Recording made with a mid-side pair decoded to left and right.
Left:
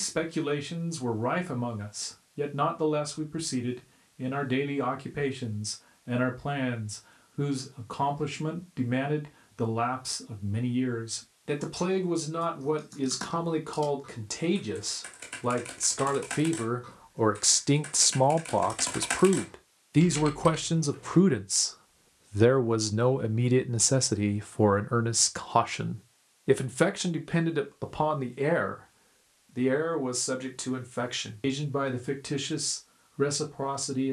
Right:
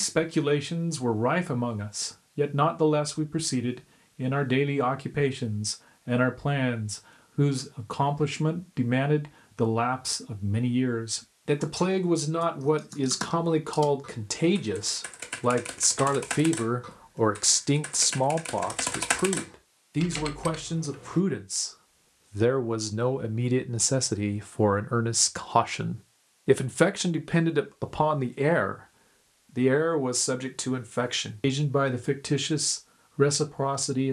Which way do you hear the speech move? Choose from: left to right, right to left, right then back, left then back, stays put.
left then back.